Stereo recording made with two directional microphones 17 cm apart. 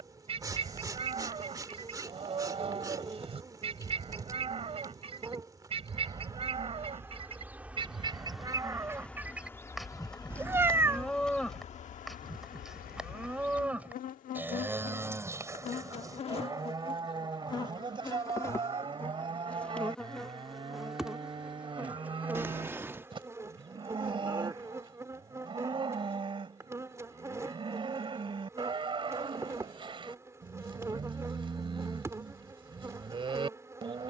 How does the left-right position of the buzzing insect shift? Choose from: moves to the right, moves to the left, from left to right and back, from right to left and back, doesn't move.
from right to left and back.